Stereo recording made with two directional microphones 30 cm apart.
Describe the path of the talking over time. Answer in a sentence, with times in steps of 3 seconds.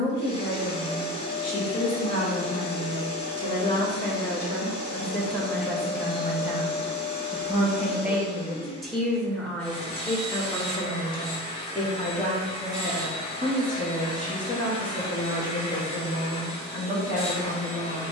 You can hear the talking on the left from 0 s, in the centre from 3 s and on the left from 12 s.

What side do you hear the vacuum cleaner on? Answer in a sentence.
In this clip you hear the vacuum cleaner on the left.